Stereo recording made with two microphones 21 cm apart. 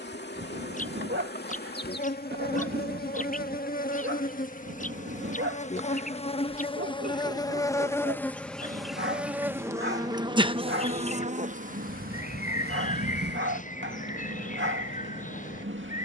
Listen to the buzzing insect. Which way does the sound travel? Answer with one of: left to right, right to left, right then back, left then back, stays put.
left to right.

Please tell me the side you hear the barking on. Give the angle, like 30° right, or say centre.
70° right.